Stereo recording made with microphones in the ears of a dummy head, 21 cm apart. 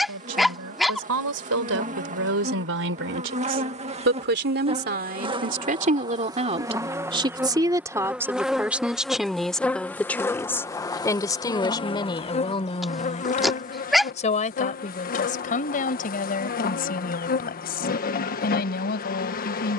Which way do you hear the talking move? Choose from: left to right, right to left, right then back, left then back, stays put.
right to left.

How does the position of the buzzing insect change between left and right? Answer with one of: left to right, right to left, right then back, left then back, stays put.
right to left.